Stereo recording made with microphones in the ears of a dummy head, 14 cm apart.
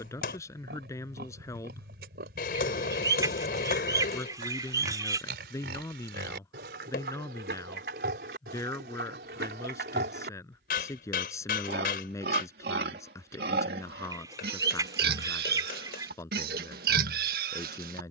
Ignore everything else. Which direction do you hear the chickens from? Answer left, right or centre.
right.